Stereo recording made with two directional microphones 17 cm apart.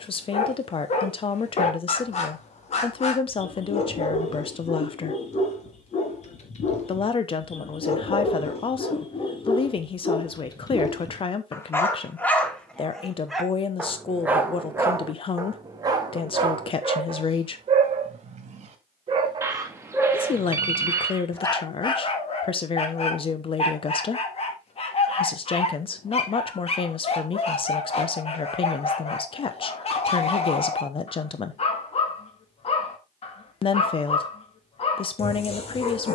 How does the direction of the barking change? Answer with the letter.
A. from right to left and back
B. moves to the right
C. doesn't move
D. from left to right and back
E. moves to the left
D.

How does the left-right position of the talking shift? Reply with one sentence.
You can hear the talking stay put.